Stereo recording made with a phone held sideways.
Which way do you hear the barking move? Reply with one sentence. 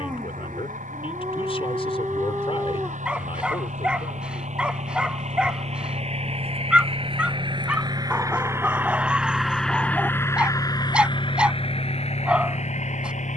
In this clip you hear the barking stay in one place.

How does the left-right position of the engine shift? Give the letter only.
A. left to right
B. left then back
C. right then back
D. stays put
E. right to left
E.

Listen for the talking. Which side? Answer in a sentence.
In this clip you hear the talking on the left.